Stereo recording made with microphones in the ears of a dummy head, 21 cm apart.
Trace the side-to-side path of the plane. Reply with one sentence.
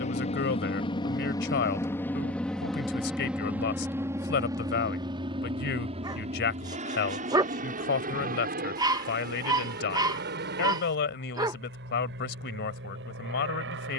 In this clip you hear the plane move from left to right.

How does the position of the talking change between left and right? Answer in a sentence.
In this clip you hear the talking stay put.